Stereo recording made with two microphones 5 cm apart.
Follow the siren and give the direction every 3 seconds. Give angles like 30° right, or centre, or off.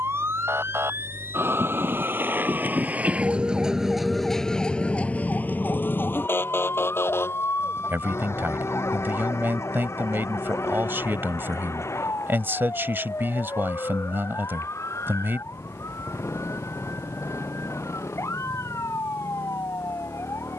60° right, 10° left, 60° left, 70° left, 80° left, 80° left, 80° left.